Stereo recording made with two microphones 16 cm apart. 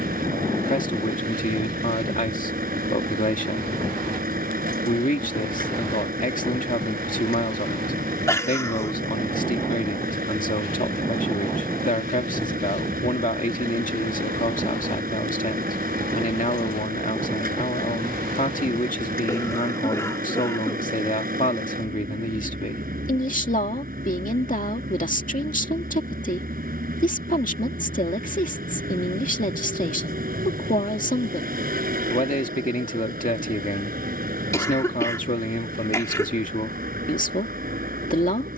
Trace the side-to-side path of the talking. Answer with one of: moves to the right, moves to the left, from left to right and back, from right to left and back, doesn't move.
doesn't move.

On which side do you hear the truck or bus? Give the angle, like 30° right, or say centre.
70° right.